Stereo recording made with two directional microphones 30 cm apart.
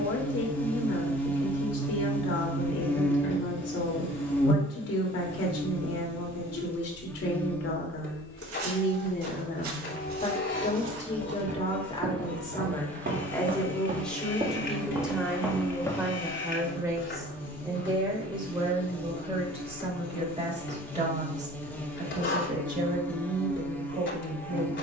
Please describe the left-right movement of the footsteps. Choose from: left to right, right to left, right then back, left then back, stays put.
right to left.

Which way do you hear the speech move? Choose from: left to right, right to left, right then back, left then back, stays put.
left to right.